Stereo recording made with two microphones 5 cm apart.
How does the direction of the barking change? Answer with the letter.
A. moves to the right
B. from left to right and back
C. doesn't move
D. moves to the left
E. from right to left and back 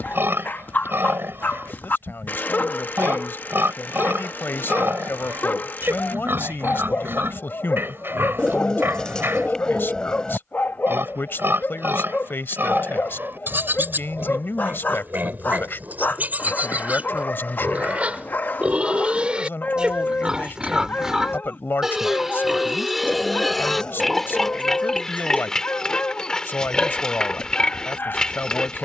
C.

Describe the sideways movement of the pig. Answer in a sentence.
You can hear the pig move from right to left.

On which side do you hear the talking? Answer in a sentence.
You can hear the talking on the left.